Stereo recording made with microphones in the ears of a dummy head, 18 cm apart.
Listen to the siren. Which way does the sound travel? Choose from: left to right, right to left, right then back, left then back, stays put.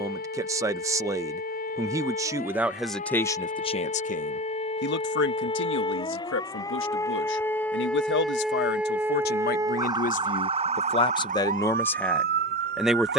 left to right.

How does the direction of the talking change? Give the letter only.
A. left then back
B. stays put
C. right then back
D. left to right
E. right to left
A.